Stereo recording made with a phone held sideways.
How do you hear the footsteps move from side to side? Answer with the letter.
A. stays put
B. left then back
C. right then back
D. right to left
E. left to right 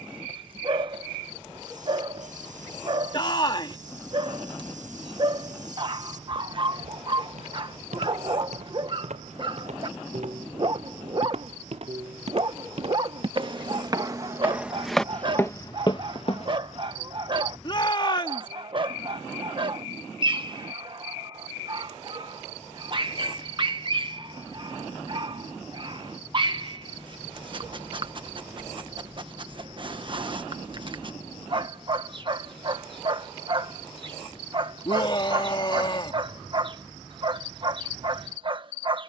D.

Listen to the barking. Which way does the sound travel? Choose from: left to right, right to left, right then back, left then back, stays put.
stays put.